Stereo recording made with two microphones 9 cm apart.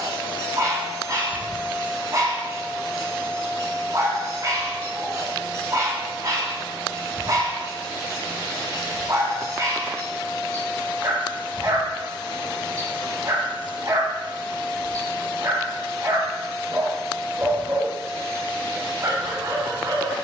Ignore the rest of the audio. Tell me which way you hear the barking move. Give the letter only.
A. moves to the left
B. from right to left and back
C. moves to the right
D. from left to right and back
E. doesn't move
E.